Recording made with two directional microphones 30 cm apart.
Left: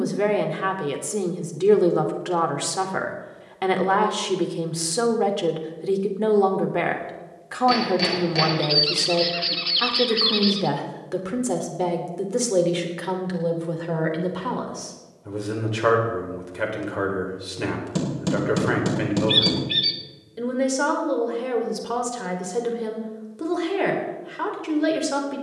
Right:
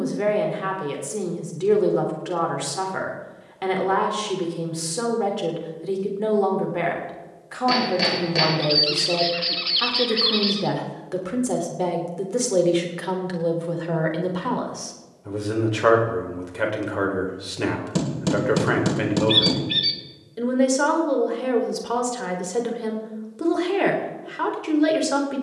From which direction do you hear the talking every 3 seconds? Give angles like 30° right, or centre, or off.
30° left, 30° left, 30° left, 10° left, centre, 10° right, 10° right, 10° right, 10° right.